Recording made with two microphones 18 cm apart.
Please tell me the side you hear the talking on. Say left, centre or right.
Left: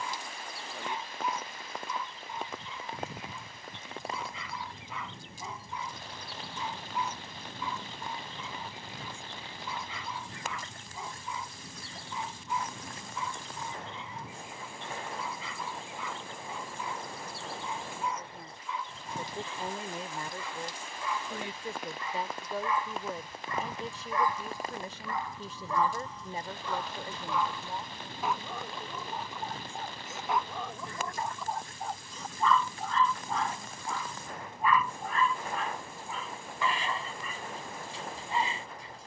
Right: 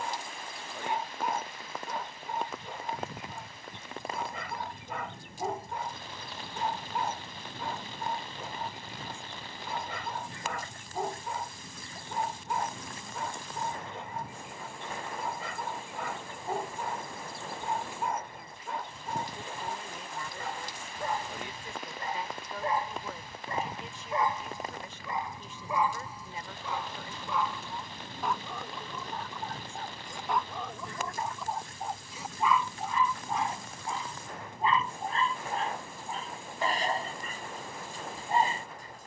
left.